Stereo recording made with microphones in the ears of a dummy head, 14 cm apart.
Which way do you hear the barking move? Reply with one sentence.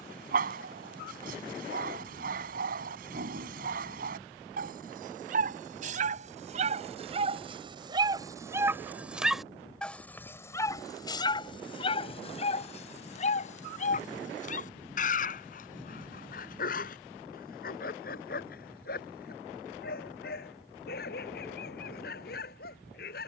In this clip you hear the barking travel towards the left.